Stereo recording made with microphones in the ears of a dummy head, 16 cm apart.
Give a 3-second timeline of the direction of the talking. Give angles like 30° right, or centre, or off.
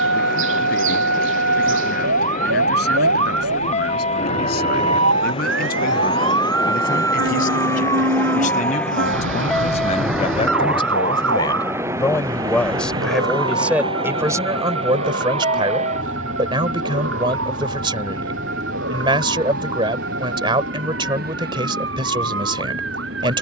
60° left, 60° left, 50° left, 30° left, 10° right, 30° right, 30° right, 30° right.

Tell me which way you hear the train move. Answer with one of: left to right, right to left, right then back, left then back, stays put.
left to right.